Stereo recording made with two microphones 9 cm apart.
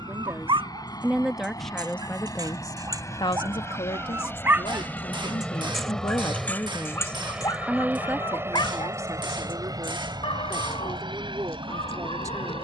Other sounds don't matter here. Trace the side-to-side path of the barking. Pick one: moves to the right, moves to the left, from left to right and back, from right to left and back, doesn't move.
moves to the left.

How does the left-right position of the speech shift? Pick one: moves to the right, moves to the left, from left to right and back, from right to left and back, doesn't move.
from right to left and back.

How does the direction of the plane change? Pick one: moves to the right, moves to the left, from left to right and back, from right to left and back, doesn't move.
moves to the right.